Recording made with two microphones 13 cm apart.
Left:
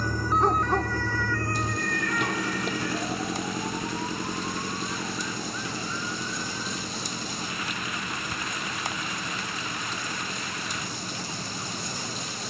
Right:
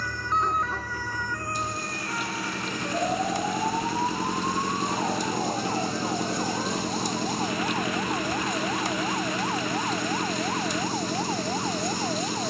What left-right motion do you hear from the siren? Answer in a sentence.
In this clip you hear the siren go from the left side to the right.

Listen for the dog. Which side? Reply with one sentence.
In this clip you hear the dog on the left.